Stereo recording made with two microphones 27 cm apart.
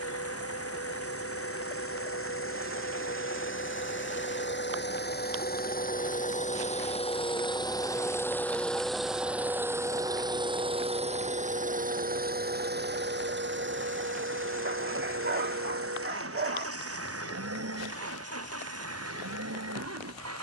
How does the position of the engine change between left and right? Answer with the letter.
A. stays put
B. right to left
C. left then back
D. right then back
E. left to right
E.